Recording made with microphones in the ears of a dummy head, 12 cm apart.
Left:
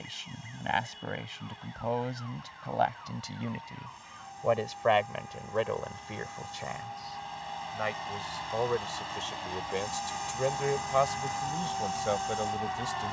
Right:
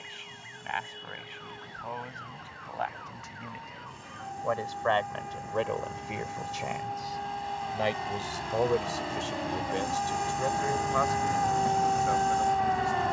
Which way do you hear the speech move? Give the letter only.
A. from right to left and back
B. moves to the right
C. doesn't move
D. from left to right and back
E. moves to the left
D.